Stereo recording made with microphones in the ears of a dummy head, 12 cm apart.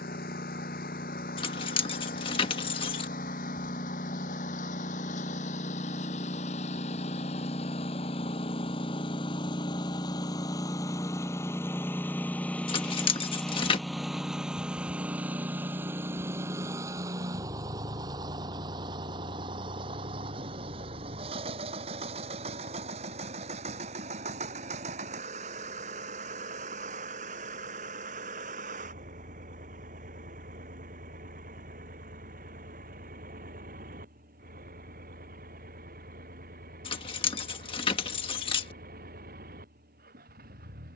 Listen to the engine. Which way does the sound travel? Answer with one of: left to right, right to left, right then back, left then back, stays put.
left to right.